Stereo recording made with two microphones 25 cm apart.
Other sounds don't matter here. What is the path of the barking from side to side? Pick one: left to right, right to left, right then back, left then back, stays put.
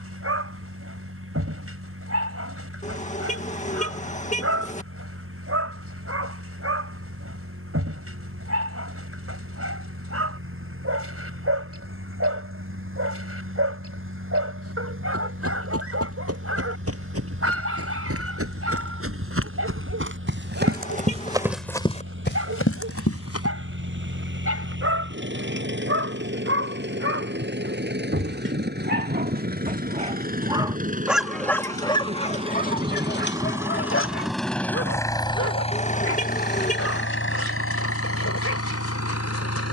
right to left.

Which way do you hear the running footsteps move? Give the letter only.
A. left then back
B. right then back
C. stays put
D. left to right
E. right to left
E.